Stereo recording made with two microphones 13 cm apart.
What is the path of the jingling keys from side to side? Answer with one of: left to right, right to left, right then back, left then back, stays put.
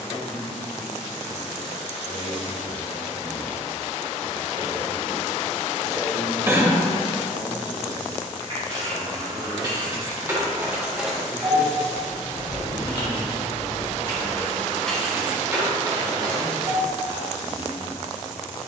left then back.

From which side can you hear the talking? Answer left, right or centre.
right.